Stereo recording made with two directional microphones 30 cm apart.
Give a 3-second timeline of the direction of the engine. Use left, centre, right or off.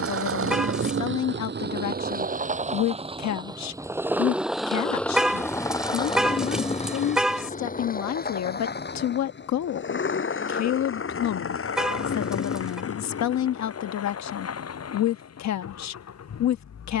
right, centre, left, left, left, left.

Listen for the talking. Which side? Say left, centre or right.
left.